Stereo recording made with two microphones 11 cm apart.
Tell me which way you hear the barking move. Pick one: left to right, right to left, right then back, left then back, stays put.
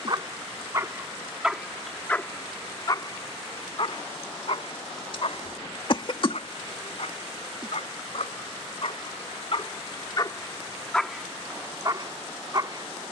left then back.